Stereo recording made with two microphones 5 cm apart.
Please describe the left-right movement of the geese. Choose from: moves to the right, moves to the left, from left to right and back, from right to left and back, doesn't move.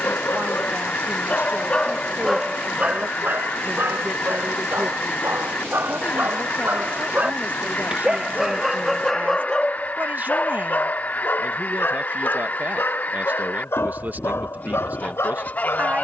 doesn't move.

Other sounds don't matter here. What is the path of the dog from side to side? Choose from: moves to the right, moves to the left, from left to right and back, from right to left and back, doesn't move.
from left to right and back.